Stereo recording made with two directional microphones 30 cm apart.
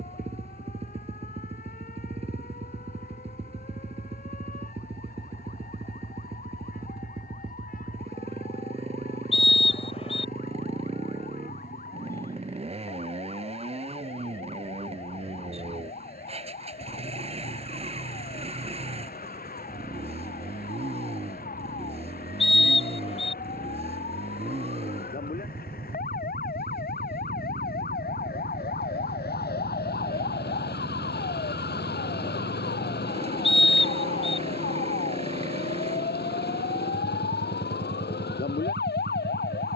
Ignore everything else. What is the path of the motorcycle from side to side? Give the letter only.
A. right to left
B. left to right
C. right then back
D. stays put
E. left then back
D.